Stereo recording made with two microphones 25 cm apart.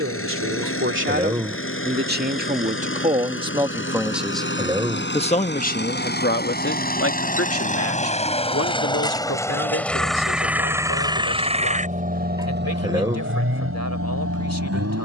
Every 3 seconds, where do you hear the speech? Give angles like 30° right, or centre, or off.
40° right, centre, 60° left, 80° left, 80° left.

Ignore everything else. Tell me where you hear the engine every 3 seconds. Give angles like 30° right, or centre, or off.
50° left, 50° left, 30° left, 10° right, 50° right.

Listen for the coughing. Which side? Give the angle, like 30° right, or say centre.
10° right.